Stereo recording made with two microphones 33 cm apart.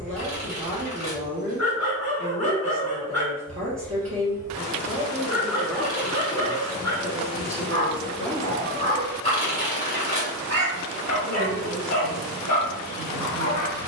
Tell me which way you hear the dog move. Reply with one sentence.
In this clip you hear the dog stay put.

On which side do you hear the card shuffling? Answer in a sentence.
You can hear the card shuffling on the left.